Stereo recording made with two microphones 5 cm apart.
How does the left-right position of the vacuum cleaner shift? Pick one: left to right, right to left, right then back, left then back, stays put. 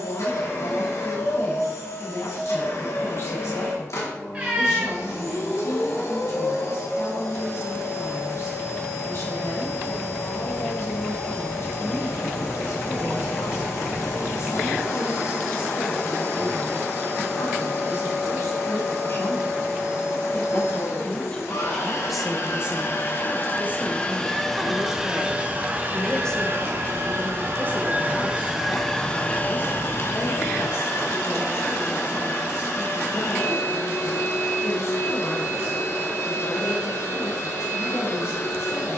right then back.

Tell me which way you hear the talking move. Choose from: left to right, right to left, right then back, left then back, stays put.
right then back.